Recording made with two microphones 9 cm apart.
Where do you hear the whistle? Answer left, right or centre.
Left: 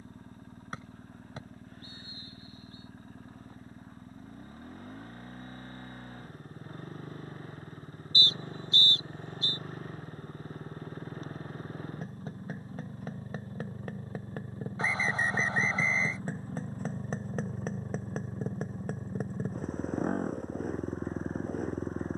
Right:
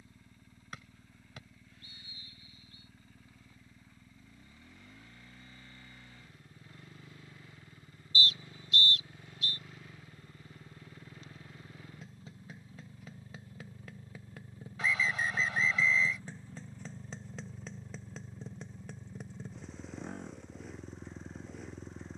left.